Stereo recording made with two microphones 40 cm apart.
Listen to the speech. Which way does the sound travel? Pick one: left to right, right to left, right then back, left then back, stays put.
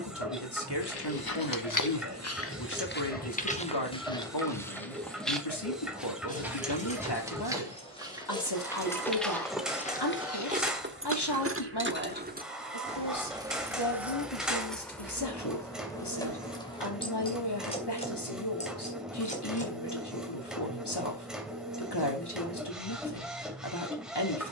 stays put.